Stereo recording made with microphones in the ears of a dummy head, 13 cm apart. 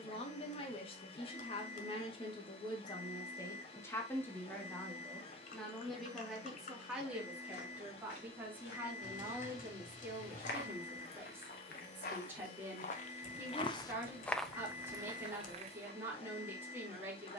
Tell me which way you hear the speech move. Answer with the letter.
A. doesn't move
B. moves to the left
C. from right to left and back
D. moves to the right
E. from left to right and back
D.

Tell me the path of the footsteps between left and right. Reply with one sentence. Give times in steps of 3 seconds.
In this clip you hear the footsteps not at all from 0 s, on the left from 6 s and on the right from 15 s.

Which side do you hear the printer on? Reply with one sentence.
You can hear the printer on the left.